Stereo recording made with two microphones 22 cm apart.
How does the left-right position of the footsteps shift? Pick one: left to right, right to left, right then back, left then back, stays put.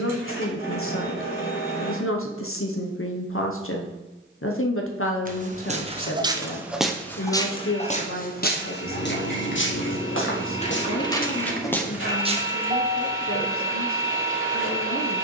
left then back.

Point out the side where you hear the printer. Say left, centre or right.
left.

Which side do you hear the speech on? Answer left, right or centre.
left.